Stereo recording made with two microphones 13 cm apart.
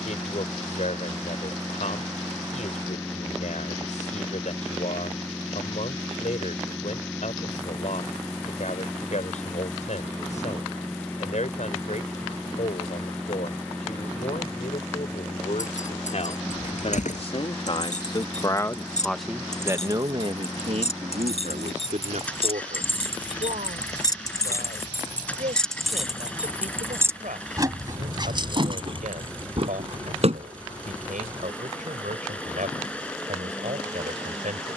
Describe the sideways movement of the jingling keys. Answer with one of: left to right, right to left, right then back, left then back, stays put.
left to right.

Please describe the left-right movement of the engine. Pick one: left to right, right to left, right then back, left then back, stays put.
stays put.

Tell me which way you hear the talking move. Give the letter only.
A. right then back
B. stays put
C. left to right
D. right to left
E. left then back
C.